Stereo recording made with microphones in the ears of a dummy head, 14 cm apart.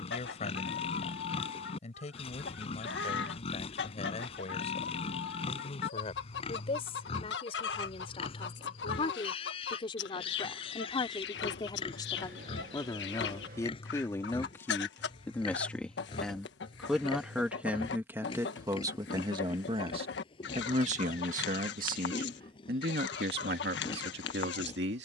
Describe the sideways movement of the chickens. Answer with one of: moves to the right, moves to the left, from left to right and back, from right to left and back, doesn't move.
doesn't move.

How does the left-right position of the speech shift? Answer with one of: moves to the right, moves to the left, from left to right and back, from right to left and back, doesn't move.
moves to the right.